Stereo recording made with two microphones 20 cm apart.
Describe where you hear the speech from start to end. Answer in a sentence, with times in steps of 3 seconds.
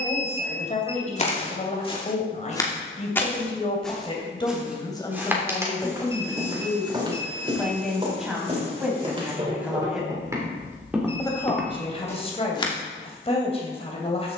You can hear the speech on the left from 0 s, in the centre from 6 s and on the left from 12 s.